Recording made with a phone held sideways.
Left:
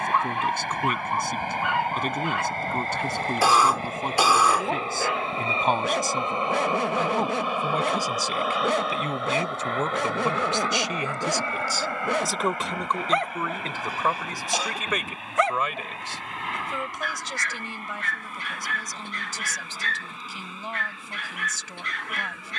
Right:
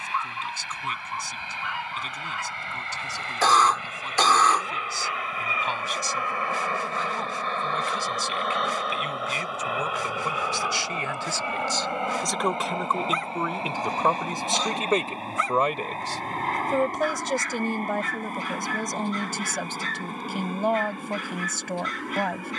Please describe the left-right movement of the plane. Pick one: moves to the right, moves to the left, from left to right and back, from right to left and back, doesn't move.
moves to the right.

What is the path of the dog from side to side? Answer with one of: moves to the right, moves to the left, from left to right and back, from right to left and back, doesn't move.
doesn't move.